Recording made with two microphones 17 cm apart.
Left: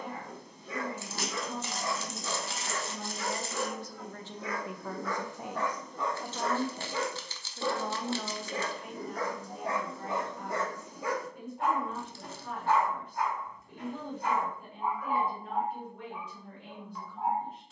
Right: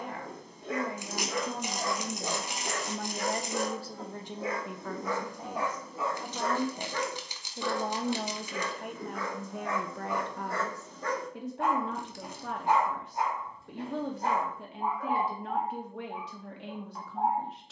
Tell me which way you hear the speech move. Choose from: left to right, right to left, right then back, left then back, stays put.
left then back.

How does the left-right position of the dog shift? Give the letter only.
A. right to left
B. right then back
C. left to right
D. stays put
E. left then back
E.